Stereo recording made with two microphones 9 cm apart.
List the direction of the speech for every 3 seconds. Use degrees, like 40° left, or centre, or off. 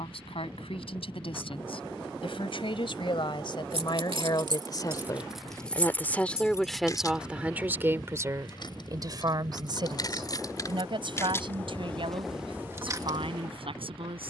70° left, 40° left, 10° right, 50° right, 70° right.